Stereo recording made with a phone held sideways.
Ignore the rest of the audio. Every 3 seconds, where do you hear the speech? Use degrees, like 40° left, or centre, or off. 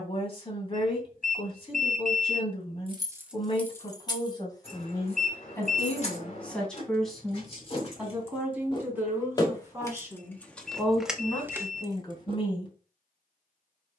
40° left, 30° left, centre, centre, 30° left.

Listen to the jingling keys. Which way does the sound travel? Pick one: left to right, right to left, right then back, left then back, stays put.
left then back.